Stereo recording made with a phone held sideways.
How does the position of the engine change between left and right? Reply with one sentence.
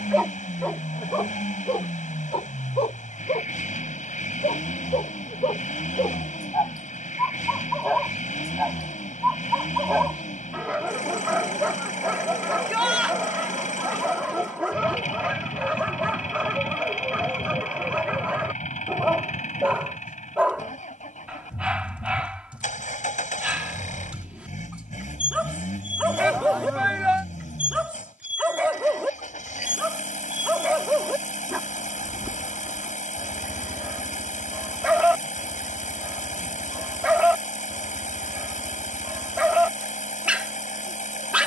In this clip you hear the engine stay in one place.